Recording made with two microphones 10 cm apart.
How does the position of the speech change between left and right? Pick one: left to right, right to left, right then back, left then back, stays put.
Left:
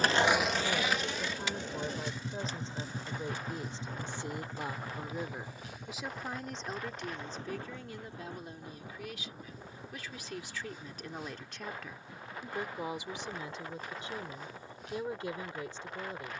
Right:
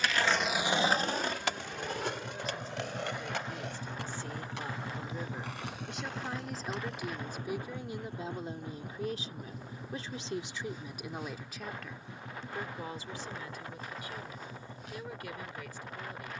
right then back.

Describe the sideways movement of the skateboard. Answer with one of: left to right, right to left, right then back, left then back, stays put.
left to right.